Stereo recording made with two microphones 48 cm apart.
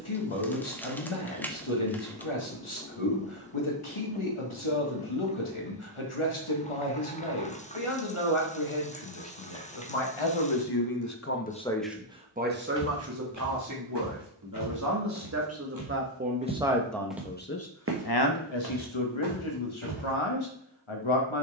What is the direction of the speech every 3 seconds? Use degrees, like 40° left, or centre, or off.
80° left, 80° left, 80° left, 50° left, 30° right, 10° right, 70° left.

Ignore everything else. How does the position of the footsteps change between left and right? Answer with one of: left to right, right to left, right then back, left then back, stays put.
left to right.